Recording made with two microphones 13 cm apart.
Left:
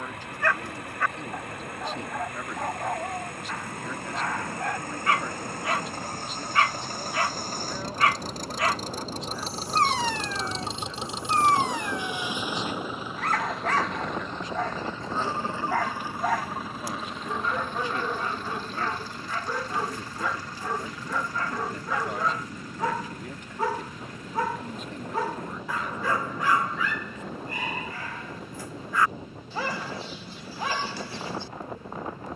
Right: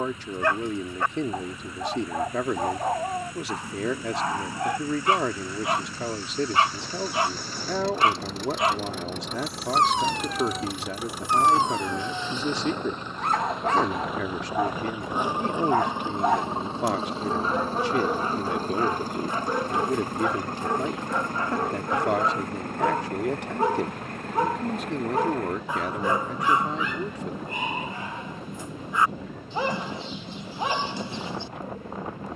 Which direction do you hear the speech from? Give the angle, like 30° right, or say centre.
80° right.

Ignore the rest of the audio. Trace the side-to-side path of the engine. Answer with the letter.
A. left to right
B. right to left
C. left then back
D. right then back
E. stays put
A.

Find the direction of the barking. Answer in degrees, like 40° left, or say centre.
20° right.